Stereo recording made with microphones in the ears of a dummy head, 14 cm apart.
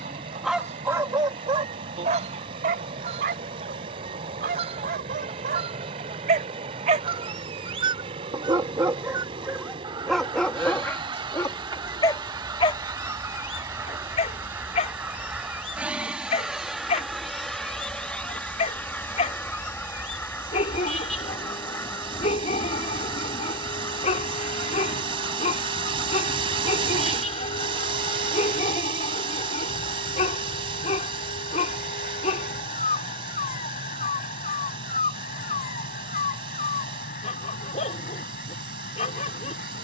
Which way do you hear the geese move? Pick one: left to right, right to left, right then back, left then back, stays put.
right to left.